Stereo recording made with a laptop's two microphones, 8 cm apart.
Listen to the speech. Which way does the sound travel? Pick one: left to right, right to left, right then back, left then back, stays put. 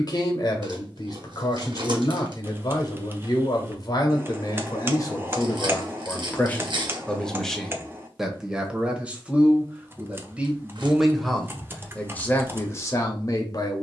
right then back.